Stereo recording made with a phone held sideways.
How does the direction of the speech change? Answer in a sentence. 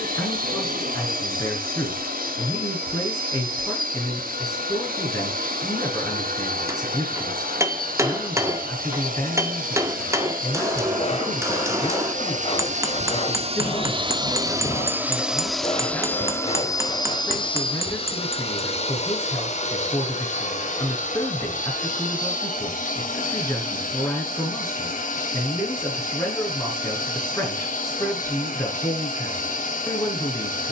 In this clip you hear the speech stay in one place.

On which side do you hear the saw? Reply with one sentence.
In this clip you hear the saw on the left.